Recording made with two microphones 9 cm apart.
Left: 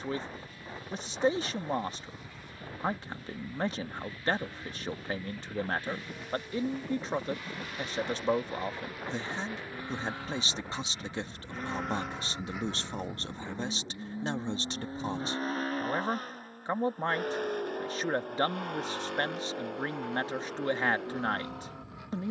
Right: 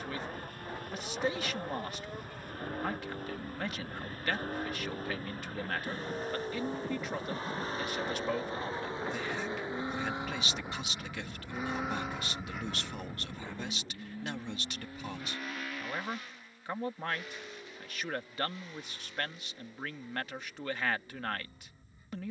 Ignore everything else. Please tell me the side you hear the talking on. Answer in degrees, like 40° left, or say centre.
30° left.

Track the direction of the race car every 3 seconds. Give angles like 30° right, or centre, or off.
50° right, 50° right, 40° right, 20° right, 10° left, 40° left, 60° left, 70° left.